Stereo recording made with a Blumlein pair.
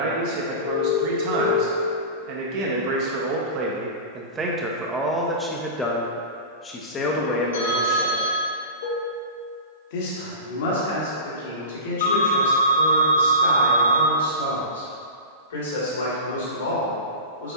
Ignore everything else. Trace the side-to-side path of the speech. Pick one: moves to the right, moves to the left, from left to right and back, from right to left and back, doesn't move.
moves to the left.